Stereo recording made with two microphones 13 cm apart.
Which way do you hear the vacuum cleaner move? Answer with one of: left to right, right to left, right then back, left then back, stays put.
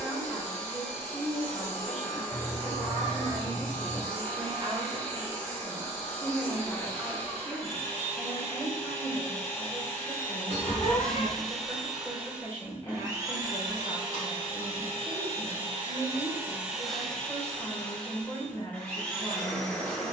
right then back.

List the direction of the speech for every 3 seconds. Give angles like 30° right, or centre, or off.
10° left, 30° right, 10° left, 20° left, 20° left, 20° left, 20° left.